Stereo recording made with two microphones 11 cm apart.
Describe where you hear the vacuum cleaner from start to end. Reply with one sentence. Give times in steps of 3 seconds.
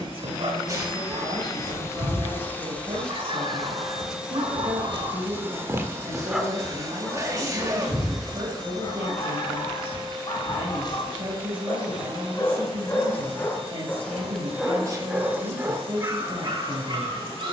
You can hear the vacuum cleaner on the left from 0 s, in the centre from 3 s and on the right from 6 s.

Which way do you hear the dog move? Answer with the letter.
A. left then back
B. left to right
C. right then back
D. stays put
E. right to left
A.